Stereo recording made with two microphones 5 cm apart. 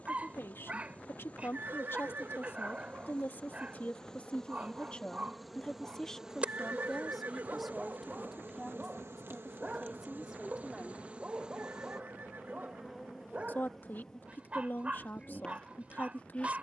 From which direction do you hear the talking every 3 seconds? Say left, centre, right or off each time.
left, left, centre, centre, left, left.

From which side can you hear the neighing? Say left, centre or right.
right.